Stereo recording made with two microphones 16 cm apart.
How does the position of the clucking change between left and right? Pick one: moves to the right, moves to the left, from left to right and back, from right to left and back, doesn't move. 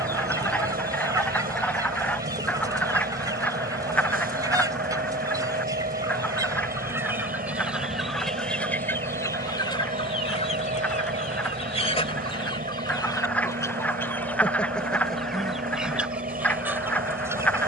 from right to left and back.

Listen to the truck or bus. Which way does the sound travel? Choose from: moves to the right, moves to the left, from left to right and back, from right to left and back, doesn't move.
doesn't move.